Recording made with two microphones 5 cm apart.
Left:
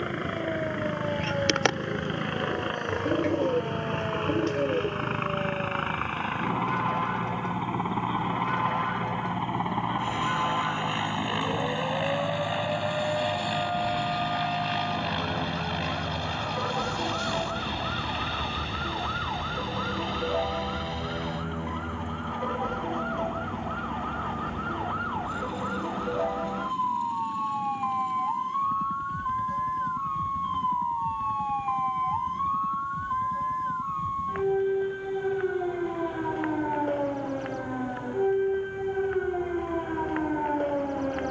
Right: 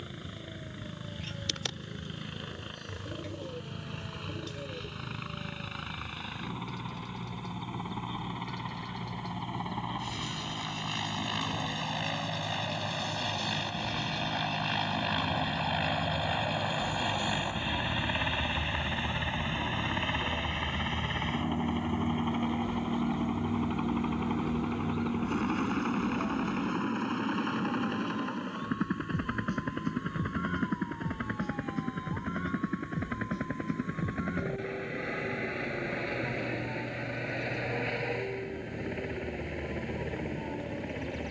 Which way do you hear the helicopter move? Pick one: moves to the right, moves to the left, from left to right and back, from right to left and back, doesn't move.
moves to the right.